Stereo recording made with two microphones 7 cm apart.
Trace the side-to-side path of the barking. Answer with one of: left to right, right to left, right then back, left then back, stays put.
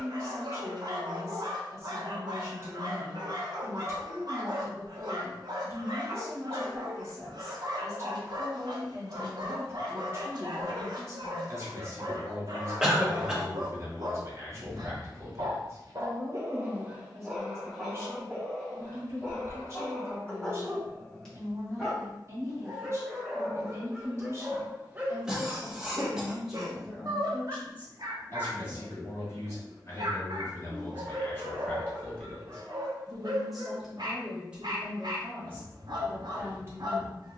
left then back.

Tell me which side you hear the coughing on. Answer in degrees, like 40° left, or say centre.
10° right.